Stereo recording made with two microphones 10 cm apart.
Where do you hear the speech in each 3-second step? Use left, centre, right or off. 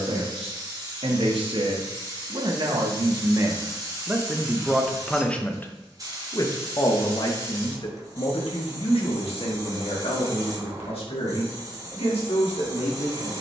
right, centre, left, left, left.